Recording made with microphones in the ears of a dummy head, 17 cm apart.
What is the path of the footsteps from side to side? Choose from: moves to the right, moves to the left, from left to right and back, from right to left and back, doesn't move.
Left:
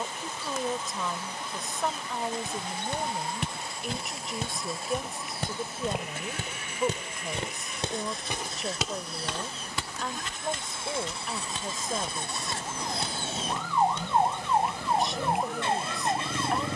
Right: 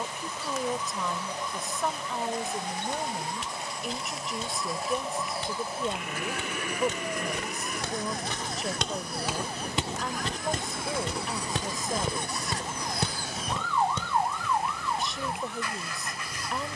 moves to the right.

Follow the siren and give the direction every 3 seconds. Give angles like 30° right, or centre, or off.
60° right, 60° right, 50° right, 30° right, 10° left, 40° left.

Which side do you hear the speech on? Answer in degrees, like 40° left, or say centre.
centre.